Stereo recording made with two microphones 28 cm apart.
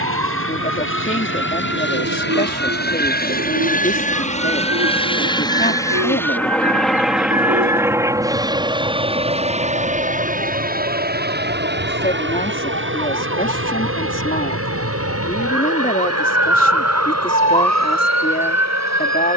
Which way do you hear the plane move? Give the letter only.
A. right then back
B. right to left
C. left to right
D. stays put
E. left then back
C.